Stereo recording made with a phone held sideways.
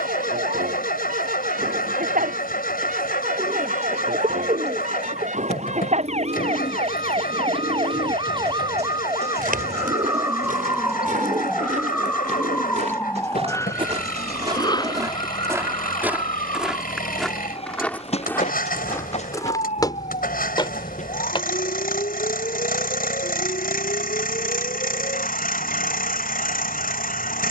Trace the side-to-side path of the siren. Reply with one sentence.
In this clip you hear the siren move to the left.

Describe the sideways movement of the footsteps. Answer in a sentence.
You can hear the footsteps travel towards the left.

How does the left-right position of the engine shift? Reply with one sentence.
You can hear the engine stay in one place.